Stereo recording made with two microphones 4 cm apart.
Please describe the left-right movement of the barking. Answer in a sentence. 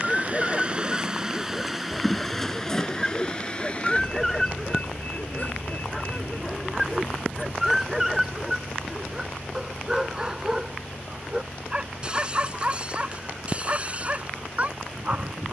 In this clip you hear the barking move to the right.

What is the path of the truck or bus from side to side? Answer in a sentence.
You can hear the truck or bus travel towards the left.